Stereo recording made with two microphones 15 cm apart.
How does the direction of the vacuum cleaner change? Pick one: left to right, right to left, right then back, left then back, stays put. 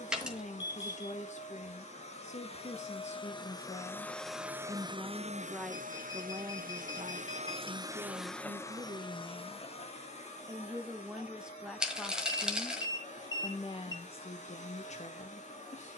right then back.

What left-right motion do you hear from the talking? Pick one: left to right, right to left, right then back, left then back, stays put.
right then back.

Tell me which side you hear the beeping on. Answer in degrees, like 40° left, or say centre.
30° left.